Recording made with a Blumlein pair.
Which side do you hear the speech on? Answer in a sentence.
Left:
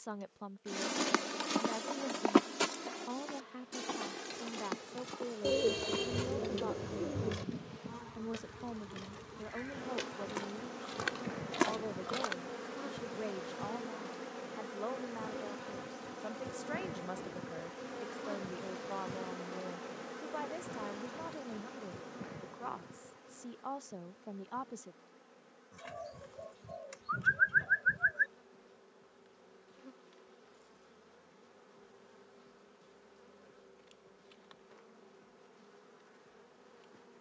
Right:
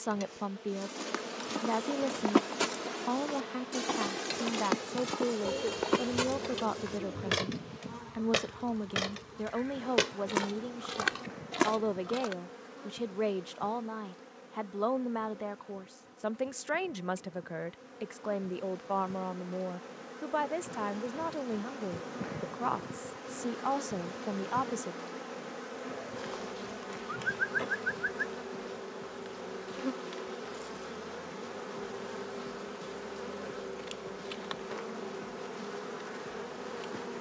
You can hear the speech on the right.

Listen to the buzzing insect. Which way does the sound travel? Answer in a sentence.
In this clip you hear the buzzing insect go left and come back.